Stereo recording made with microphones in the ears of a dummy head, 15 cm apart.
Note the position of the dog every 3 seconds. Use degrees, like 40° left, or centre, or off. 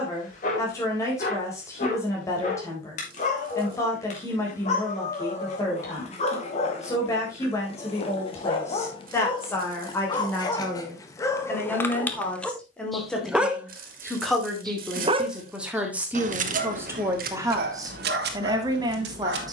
50° left, 50° left, 40° left, 20° left, centre, 50° right, 70° right.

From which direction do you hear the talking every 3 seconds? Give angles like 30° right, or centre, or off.
20° left, 20° left, 20° left, 10° left, centre, 10° right, 20° right.